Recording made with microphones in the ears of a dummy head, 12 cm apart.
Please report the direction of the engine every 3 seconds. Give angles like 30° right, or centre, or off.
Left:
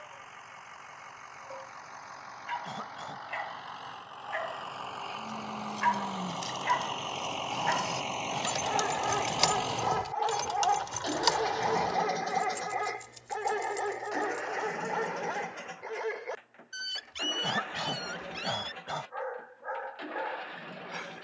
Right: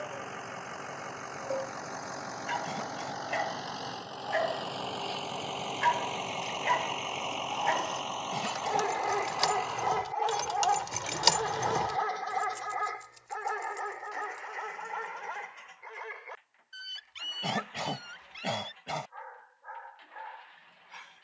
60° right, 40° right, centre, 40° left, 60° left, 70° left, 80° left.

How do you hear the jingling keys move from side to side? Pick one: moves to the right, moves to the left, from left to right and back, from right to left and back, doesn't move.
from left to right and back.